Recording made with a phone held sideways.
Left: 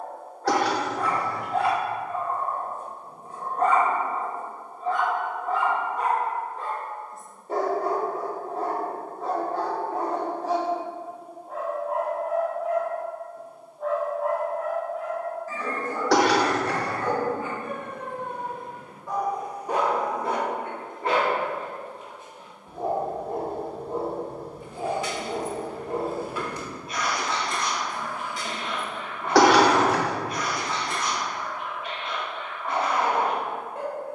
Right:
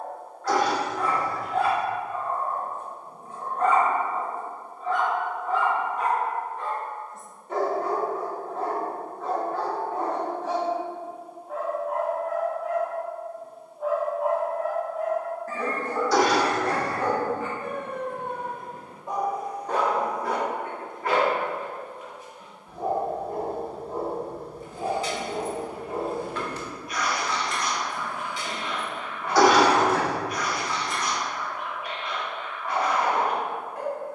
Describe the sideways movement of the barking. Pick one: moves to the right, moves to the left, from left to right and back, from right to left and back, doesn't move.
from left to right and back.